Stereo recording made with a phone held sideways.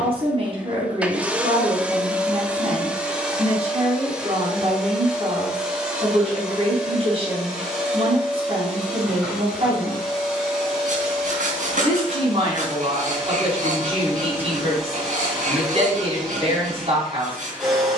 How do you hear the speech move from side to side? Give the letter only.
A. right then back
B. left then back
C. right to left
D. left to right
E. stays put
E.